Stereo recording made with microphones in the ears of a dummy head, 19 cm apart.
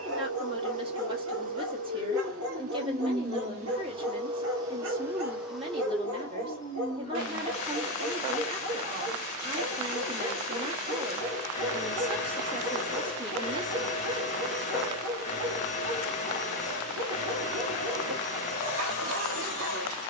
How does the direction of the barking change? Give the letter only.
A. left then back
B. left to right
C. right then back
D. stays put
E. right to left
D.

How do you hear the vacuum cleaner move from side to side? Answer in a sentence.
In this clip you hear the vacuum cleaner move to the left.